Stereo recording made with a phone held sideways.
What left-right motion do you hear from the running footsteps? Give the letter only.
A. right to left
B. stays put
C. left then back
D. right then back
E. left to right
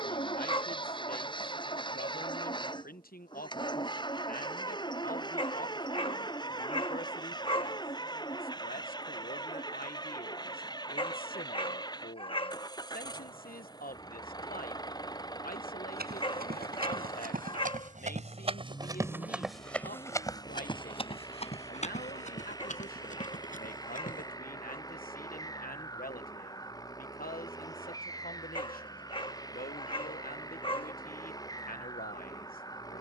A.